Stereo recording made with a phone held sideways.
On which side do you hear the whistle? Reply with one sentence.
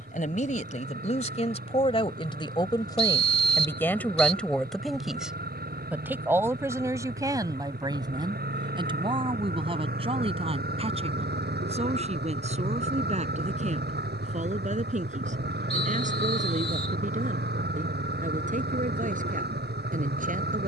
In this clip you hear the whistle on the left.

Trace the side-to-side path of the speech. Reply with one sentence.
You can hear the speech move to the right.